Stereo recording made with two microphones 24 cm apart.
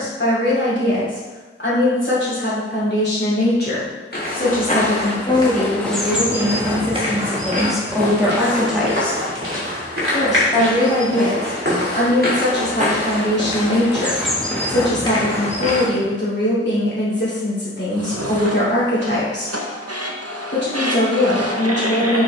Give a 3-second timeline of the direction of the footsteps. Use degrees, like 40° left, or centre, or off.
off, 20° left, 30° right, 50° right, 20° right, 30° left, off, off.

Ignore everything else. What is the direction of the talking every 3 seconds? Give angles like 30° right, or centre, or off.
50° left, 30° left, centre, 30° left, 50° left, 50° left, 50° left, 50° left.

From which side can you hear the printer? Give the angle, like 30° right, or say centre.
70° right.